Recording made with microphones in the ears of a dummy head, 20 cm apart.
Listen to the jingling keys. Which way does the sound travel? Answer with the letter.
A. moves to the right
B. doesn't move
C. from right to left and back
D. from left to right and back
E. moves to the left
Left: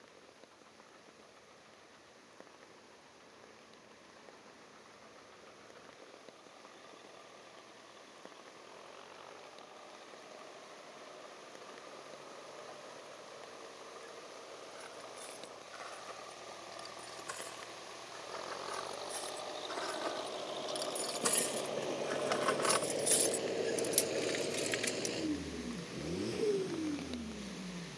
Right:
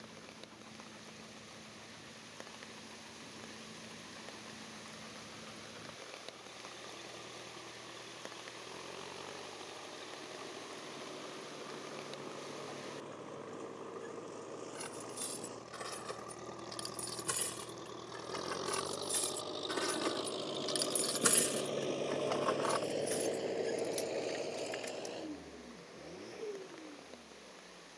E.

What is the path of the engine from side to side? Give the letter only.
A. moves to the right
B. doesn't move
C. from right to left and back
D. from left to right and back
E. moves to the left
E.